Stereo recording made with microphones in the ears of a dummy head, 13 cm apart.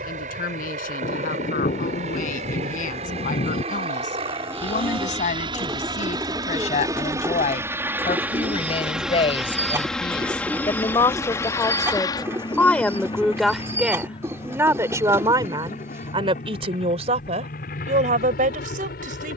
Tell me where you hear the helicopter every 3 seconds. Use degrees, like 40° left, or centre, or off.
50° right, 40° right, 20° right, 10° left, 30° left, 50° left, 60° left.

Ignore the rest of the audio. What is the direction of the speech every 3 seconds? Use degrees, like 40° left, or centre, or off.
60° left, 50° left, 50° left, 30° left, centre, 40° right, 60° right.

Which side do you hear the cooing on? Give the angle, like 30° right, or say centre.
20° right.